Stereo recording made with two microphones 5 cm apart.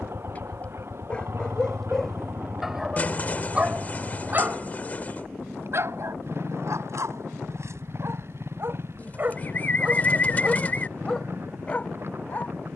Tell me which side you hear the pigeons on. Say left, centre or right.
left.